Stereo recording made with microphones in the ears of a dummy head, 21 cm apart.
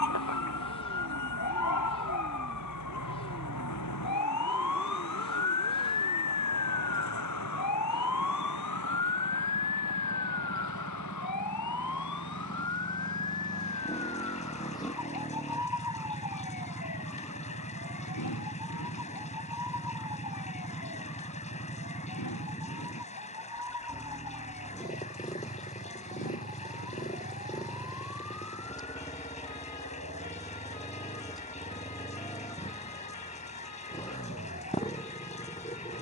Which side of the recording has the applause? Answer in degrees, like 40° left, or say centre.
30° left.